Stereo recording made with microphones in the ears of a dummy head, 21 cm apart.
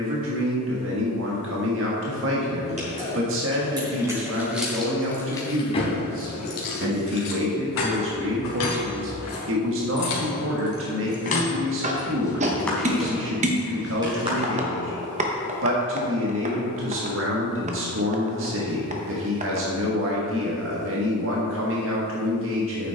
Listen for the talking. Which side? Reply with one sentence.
In this clip you hear the talking on the right.